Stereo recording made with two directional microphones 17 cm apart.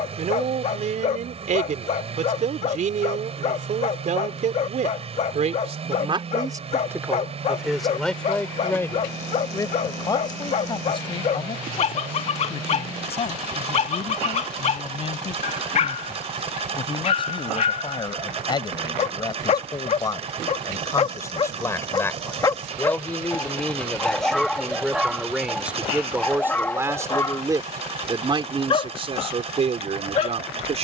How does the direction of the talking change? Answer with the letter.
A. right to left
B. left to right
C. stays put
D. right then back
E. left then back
E.